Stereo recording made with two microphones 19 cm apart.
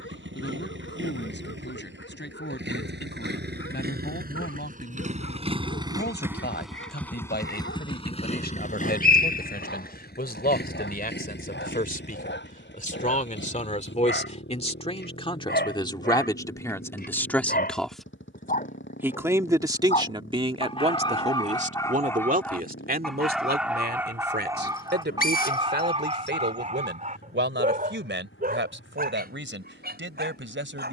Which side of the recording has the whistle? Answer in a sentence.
You can hear the whistle on the left.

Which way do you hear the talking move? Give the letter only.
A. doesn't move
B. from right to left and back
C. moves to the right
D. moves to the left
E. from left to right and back
C.